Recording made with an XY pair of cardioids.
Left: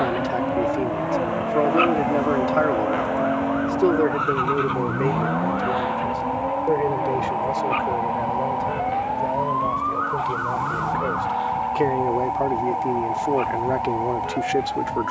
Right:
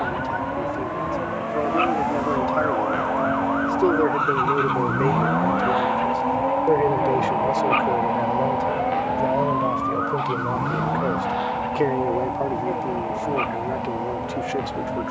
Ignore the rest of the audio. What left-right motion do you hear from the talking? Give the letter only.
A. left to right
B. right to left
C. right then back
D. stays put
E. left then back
C.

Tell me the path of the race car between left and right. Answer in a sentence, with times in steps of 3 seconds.
You can hear the race car on the left from 0 s, in the centre from 3 s and on the right from 6 s.